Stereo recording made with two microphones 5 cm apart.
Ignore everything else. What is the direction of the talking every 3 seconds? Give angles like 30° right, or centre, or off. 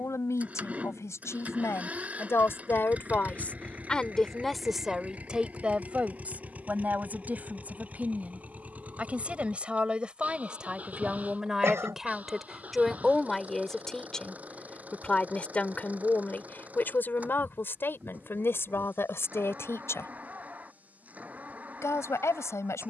70° left, centre, 30° right, 20° right, 10° left, 40° left, 60° left, 70° left.